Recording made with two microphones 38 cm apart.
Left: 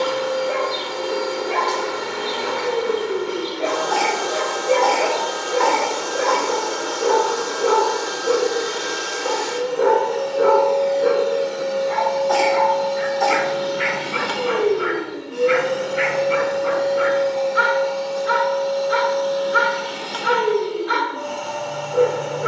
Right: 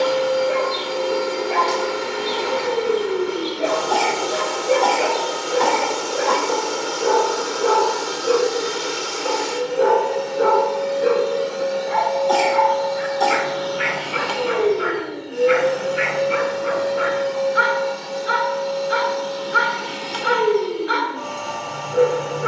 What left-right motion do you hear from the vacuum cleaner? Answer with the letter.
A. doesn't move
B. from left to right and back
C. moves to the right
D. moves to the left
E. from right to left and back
E.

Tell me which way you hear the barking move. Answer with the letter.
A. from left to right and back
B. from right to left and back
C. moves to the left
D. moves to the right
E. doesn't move
E.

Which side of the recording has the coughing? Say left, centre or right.
right.